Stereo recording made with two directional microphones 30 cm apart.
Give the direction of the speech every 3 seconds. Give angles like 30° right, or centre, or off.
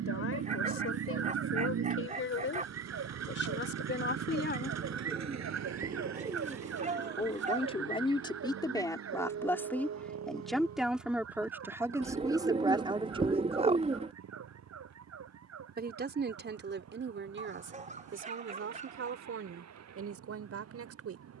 50° left, 40° left, 20° left, centre, 20° right, 40° right, 50° right.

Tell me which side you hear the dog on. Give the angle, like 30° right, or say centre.
20° right.